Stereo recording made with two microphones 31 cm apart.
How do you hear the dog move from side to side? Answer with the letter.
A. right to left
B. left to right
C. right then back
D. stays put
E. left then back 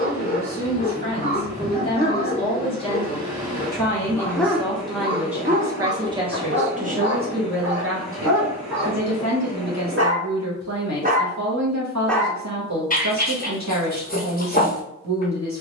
C.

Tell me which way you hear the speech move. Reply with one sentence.
In this clip you hear the speech move to the right.